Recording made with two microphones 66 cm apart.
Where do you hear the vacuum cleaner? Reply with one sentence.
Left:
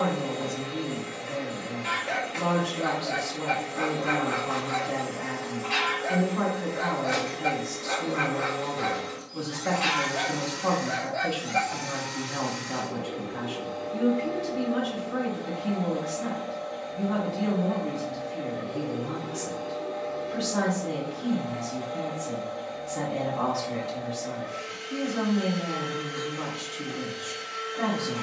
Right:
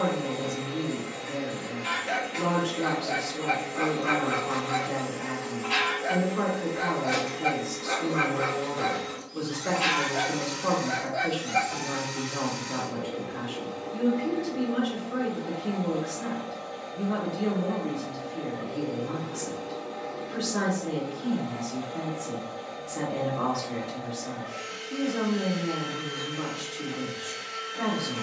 In this clip you hear the vacuum cleaner on the right.